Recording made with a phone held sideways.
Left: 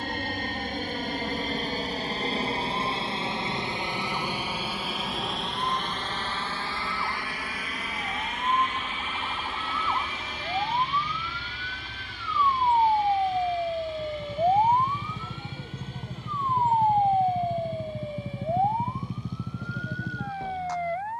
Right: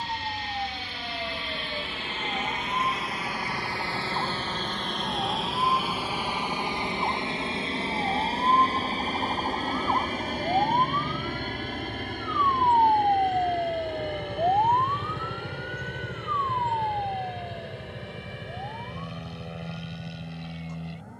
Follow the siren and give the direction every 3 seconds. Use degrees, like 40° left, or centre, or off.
50° right, 50° right, 40° right, 30° right, centre, 40° left, 70° left.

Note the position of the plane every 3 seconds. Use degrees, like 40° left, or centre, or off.
40° left, 10° left, 20° right, 40° right, 50° right, 60° right, 60° right.